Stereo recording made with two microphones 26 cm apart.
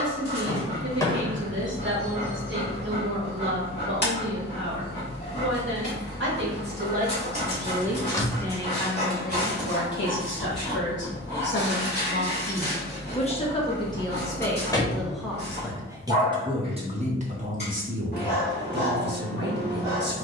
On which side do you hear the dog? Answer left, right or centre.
left.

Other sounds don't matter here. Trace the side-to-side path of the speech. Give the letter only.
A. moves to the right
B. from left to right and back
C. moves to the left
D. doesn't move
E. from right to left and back
E.